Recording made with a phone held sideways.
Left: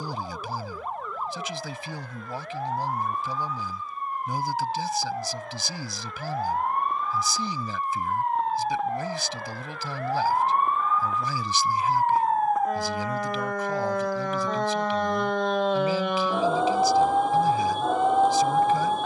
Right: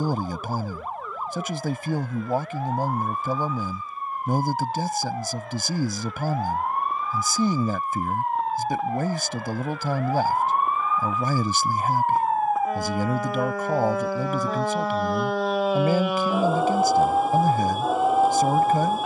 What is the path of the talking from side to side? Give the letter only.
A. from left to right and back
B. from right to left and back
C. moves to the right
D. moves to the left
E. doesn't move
E.